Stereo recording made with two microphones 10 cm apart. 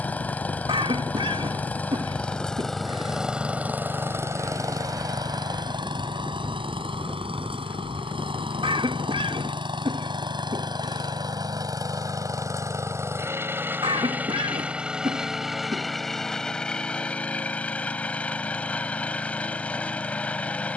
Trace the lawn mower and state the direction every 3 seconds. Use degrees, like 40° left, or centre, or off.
10° left, 30° right, 70° right, 50° right, 30° right, 10° left, 10° left.